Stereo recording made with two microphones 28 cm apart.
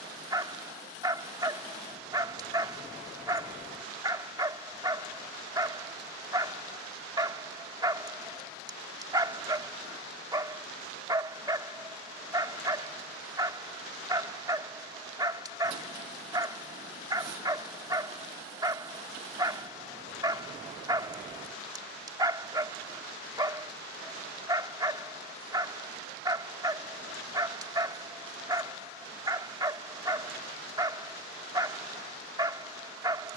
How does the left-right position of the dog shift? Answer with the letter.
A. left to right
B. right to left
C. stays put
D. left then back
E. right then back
C.